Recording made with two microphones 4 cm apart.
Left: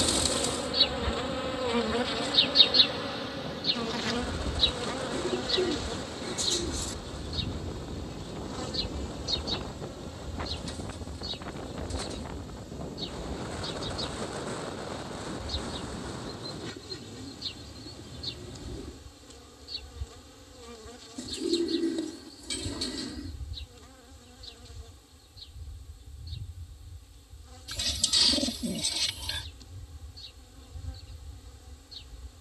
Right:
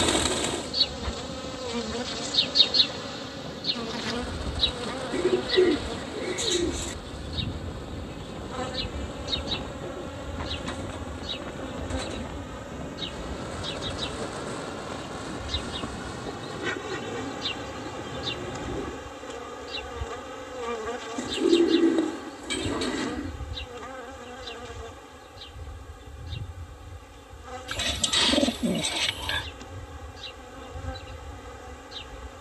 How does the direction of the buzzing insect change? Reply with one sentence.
You can hear the buzzing insect go from the left side to the right.